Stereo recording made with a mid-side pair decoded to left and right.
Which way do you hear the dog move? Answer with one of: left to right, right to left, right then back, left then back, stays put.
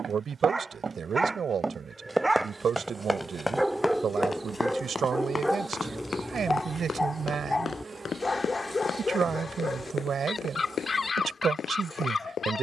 right to left.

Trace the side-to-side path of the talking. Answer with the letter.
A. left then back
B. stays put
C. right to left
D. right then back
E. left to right
B.